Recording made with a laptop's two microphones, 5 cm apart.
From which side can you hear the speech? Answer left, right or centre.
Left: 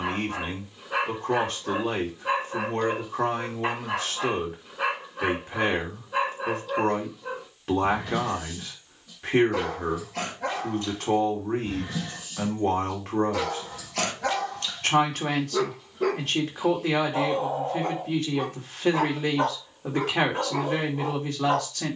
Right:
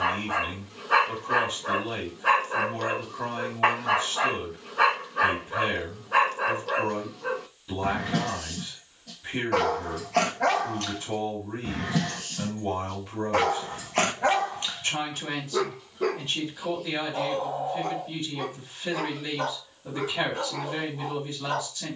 left.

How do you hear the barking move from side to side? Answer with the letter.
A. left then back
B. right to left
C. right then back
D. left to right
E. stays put
B.